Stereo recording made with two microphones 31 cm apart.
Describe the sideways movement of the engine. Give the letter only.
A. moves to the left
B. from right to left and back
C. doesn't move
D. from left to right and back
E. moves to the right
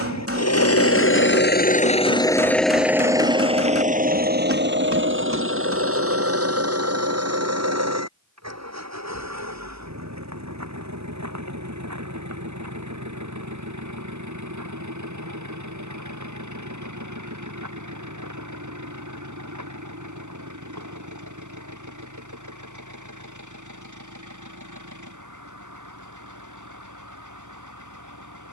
E.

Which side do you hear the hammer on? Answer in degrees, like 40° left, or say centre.
50° right.